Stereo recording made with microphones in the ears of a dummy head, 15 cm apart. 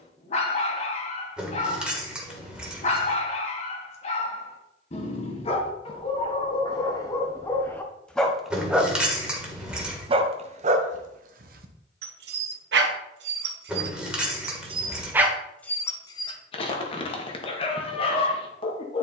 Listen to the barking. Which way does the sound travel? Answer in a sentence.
In this clip you hear the barking go right and come back.